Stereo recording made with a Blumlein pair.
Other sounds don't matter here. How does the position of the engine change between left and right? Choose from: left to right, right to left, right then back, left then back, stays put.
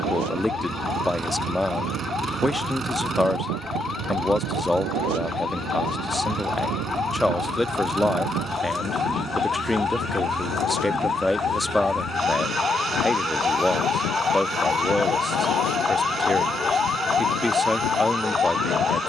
stays put.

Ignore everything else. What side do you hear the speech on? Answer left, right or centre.
centre.